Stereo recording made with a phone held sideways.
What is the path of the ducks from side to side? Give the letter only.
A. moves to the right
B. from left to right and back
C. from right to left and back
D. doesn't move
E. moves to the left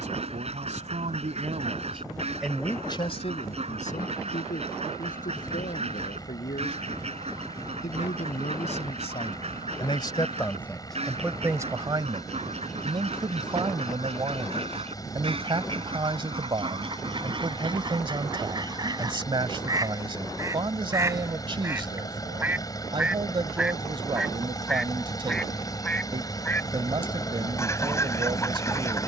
E.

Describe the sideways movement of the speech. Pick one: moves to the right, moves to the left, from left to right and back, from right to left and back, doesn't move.
from right to left and back.